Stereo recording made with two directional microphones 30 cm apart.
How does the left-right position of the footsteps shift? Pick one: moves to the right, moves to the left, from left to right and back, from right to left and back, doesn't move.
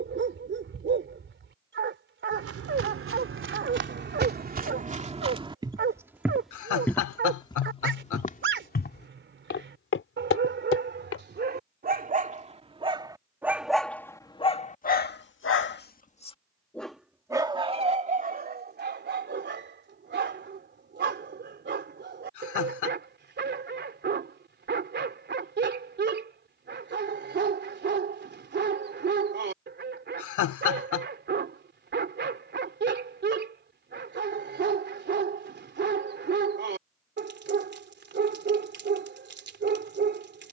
moves to the left.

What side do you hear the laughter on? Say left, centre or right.
left.